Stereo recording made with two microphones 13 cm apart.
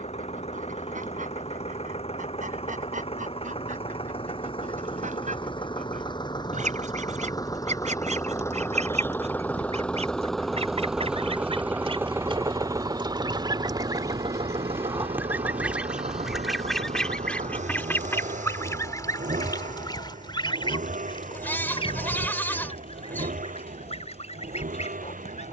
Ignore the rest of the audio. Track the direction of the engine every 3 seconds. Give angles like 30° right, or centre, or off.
50° left, 40° left, 30° left, centre, 30° right, 60° right, 70° right, 80° right, 80° right.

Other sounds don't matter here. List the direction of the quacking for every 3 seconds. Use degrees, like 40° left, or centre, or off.
70° right, 70° right, 60° right, 50° right, 30° right, centre, 30° left, 50° left, 60° left.